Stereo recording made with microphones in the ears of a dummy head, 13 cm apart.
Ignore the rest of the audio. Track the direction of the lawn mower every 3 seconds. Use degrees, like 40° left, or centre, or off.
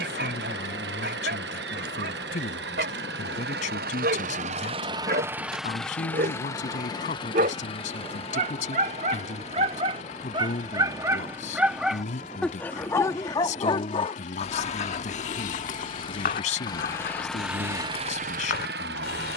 80° right, 40° right, 30° left, 50° left, 50° left, 20° left, 70° right.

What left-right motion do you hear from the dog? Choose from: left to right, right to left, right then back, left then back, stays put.
right to left.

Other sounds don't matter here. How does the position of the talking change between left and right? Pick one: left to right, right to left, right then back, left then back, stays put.
stays put.